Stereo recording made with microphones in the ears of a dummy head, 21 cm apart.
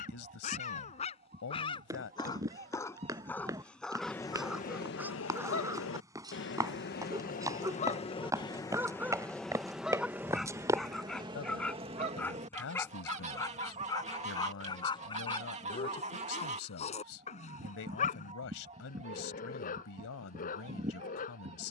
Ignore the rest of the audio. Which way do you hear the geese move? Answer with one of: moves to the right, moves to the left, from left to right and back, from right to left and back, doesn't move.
from right to left and back.